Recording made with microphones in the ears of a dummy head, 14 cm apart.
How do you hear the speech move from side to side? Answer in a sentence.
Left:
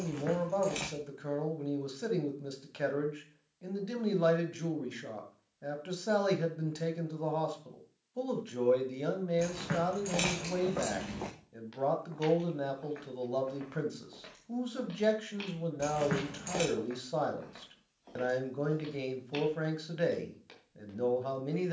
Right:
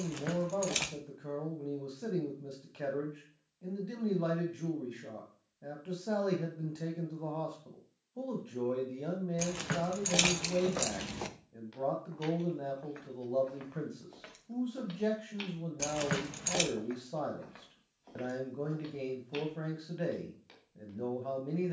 In this clip you hear the speech stay in one place.